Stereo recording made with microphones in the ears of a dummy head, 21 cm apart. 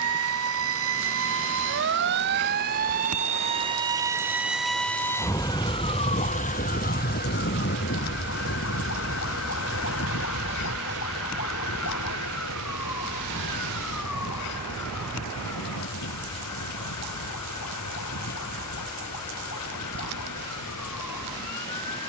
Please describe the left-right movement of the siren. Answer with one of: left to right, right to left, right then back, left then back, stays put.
right to left.